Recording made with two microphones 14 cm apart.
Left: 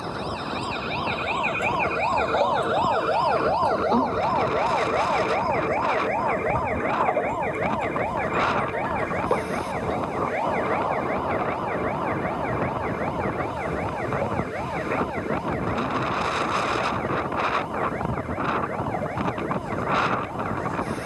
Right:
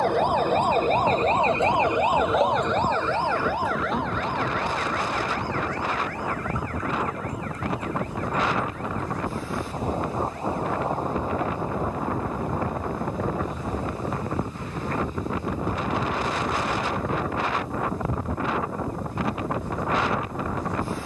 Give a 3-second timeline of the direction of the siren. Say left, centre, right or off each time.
right, left, left, left, left, left, left.